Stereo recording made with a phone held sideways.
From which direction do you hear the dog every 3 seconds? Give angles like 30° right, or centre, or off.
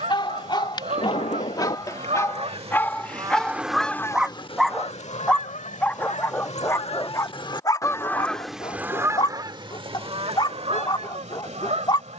30° left, centre, 20° left, 30° left.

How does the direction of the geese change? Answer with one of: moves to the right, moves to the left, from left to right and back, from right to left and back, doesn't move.
from right to left and back.